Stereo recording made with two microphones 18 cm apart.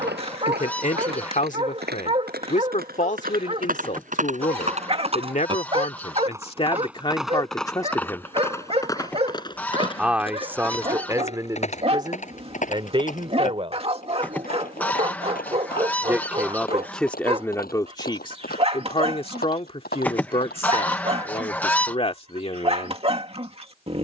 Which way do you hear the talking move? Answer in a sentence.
You can hear the talking go right and come back.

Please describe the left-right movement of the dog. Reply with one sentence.
You can hear the dog stay put.